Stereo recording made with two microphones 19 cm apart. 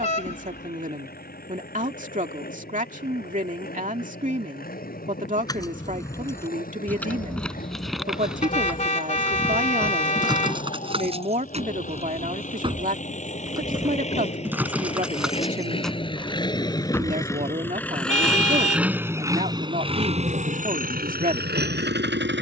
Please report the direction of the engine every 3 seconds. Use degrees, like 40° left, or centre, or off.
50° left, 50° left, 50° left, 50° left, 40° left, 20° left, 20° right, 60° right.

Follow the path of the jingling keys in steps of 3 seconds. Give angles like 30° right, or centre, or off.
off, 20° left, centre, 30° right, 20° right, centre, off, off.